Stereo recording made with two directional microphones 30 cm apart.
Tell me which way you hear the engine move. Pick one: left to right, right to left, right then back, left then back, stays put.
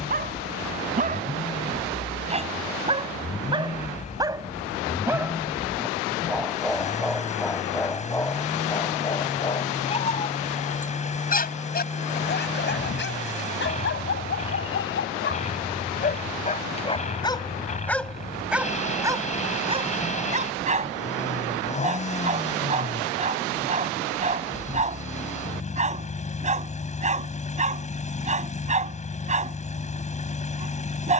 stays put.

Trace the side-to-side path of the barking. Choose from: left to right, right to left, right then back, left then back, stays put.
left then back.